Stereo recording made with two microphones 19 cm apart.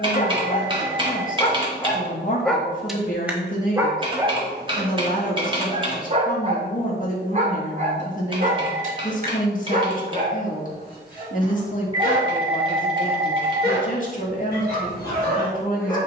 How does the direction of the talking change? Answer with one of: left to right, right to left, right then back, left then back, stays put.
stays put.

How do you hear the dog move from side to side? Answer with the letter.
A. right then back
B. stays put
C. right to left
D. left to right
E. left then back
D.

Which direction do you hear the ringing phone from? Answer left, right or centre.
right.